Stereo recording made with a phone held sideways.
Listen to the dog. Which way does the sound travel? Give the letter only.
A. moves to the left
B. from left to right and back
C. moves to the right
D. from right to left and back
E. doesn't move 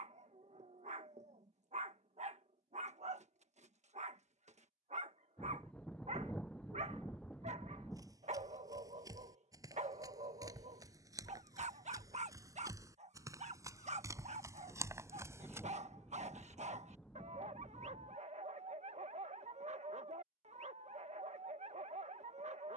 E.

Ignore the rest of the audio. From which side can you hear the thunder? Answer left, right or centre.
centre.